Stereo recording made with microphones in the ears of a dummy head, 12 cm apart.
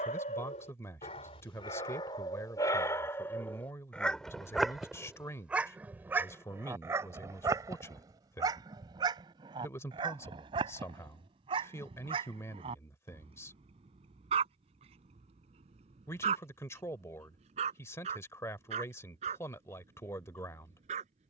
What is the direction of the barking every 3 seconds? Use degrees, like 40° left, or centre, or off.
40° left, centre, 20° right, 40° right, 40° right, 50° right, 50° right.